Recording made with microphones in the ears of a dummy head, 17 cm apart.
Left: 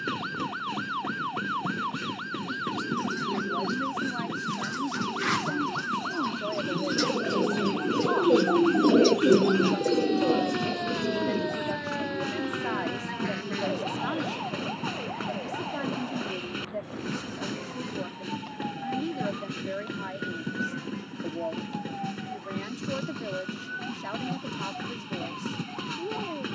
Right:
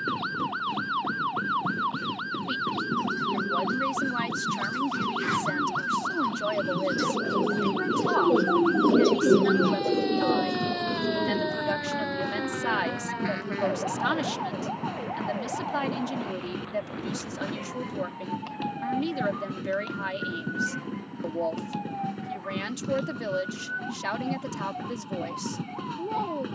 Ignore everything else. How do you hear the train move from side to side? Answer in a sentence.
You can hear the train stay put.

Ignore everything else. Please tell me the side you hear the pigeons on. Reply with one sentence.
In this clip you hear the pigeons on the left.